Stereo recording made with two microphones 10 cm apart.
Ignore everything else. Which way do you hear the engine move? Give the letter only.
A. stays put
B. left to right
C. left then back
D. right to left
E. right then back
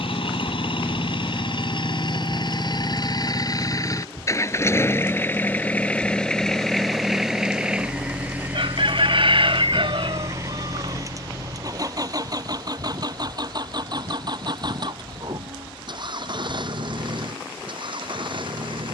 B.